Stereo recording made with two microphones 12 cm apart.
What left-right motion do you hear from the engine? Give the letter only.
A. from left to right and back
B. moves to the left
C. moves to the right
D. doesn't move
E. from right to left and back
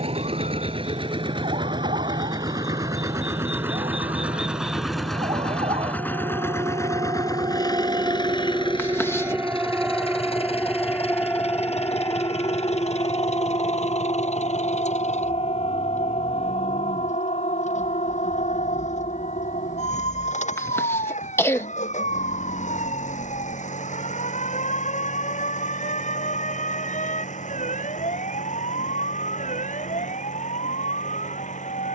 B.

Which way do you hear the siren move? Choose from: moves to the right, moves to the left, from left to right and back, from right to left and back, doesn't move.
moves to the left.